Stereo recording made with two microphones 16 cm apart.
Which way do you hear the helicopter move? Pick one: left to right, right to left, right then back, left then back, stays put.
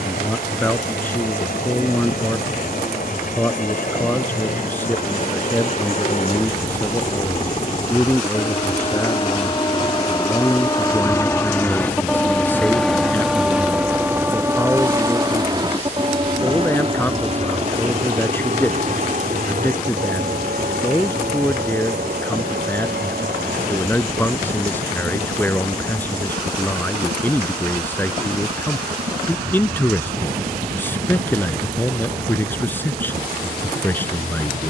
left to right.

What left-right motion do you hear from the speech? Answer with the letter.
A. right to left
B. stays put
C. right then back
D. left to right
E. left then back
B.